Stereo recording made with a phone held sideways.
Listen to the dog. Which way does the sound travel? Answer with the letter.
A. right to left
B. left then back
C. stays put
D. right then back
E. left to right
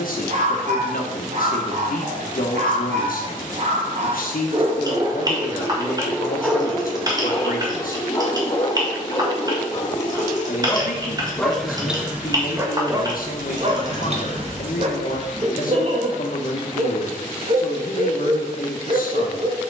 B.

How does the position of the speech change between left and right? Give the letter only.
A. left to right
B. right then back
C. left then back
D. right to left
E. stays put
E.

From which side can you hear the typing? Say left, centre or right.
right.